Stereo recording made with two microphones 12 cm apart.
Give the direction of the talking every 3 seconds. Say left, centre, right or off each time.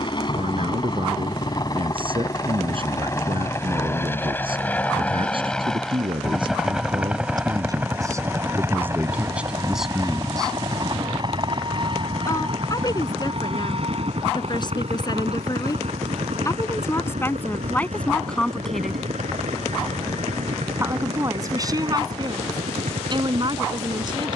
right, right, right, centre, left, left, centre, right.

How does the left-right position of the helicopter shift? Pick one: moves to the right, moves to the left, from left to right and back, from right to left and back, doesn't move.
moves to the right.